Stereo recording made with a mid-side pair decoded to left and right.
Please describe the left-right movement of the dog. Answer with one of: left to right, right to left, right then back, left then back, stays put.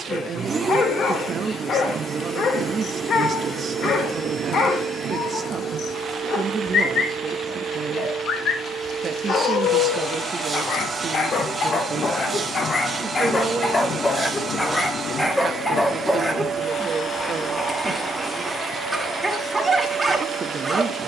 left to right.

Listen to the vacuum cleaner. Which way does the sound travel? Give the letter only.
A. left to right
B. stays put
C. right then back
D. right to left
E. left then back
B.